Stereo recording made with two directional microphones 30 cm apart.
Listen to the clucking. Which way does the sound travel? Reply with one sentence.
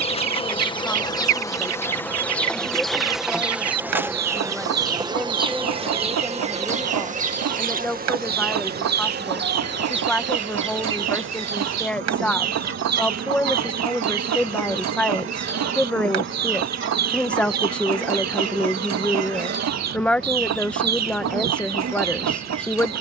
You can hear the clucking stay put.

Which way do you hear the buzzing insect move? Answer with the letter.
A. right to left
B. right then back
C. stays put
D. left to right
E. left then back
D.